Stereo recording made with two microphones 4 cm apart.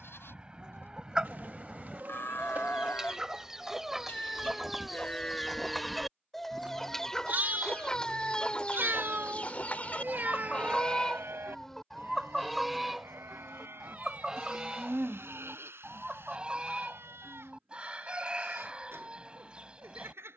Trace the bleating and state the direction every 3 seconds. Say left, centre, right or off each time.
left, left, right, right, right, right, right.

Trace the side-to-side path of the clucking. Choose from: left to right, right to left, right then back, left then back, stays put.
left then back.